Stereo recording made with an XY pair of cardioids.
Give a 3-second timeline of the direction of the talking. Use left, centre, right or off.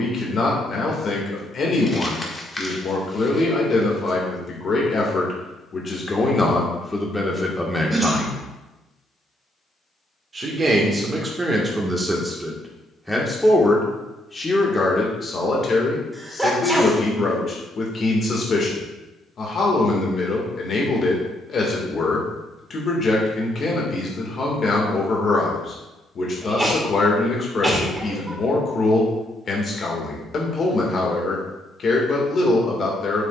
left, left, centre, right, centre, left, left, left, left, left, left.